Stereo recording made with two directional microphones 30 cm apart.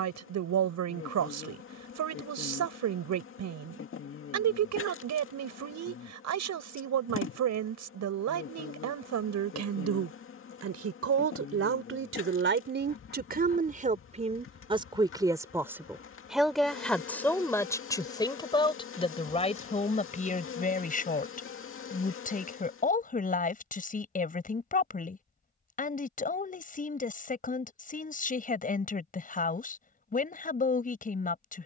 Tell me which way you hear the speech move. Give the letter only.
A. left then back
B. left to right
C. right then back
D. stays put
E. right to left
E.